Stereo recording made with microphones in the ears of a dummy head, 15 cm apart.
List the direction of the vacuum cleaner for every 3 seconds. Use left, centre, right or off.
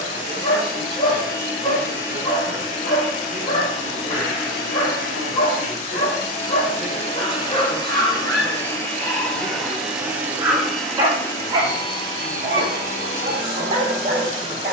left, left, left, centre, left.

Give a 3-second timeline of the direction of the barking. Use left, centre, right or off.
left, left, left, centre, right.